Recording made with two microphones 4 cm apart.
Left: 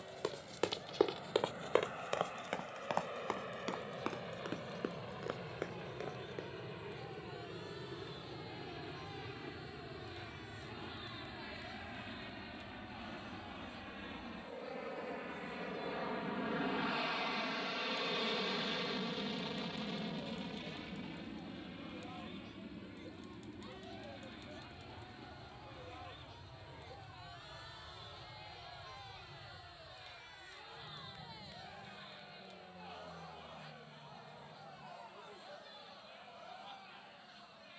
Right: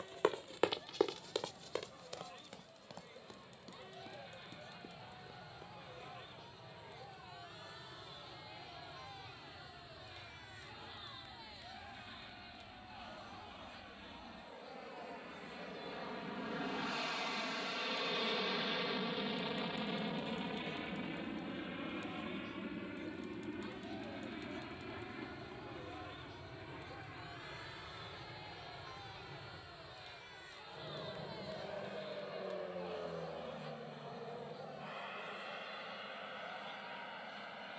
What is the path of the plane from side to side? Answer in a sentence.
In this clip you hear the plane travel towards the right.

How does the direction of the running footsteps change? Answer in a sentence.
You can hear the running footsteps go from the right side to the left.